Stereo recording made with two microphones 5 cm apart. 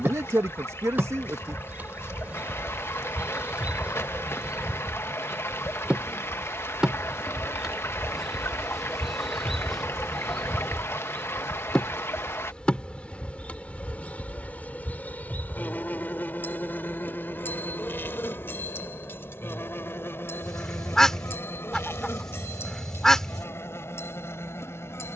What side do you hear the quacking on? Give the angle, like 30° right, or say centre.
10° left.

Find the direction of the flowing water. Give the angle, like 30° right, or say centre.
60° left.